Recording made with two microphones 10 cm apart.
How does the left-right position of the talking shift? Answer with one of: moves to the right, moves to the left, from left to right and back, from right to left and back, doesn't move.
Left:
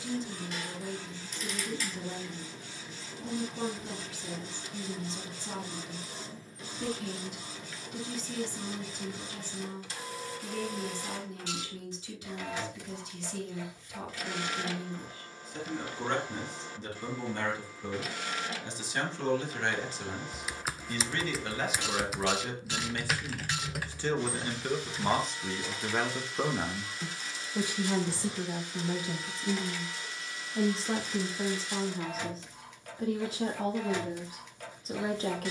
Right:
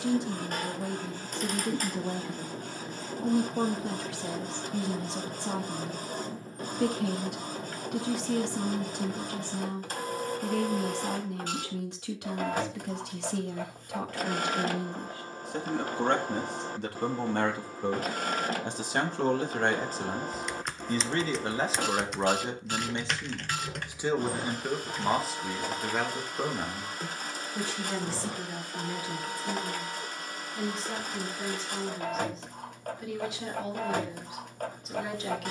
moves to the left.